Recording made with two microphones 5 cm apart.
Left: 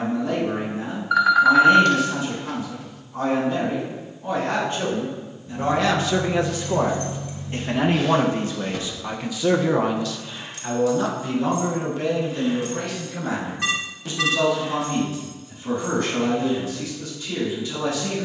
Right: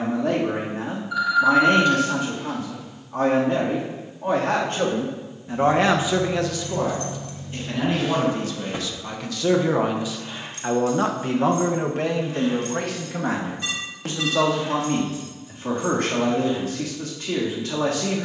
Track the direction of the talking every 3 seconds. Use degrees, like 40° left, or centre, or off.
80° right, 70° right, 30° left, 20° right, 70° right, 80° right.